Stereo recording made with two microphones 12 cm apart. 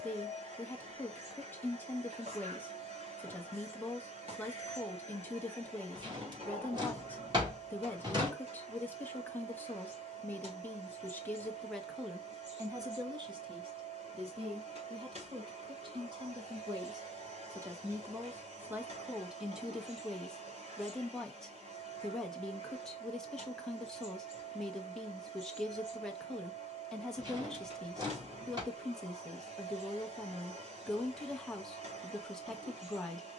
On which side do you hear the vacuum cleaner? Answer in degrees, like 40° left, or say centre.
70° right.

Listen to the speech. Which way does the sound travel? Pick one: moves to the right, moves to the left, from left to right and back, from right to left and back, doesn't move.
from left to right and back.